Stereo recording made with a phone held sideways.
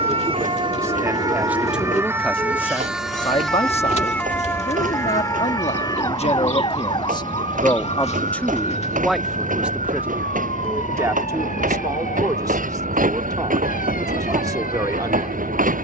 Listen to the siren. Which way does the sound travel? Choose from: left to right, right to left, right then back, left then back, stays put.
right to left.